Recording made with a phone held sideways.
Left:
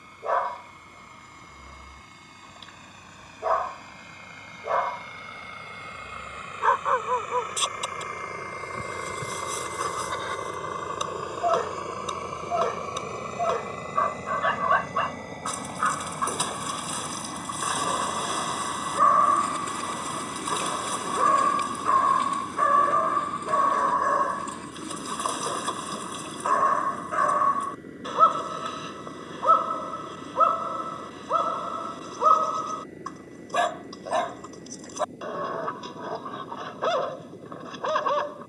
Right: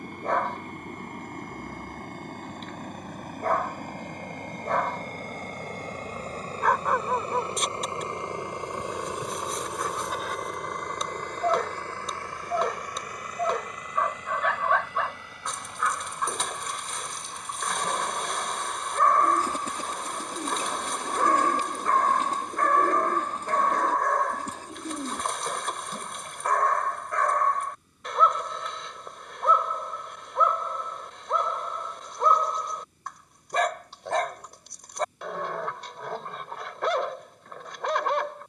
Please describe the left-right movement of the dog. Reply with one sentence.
In this clip you hear the dog stay in one place.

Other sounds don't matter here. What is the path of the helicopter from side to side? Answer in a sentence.
In this clip you hear the helicopter move from right to left.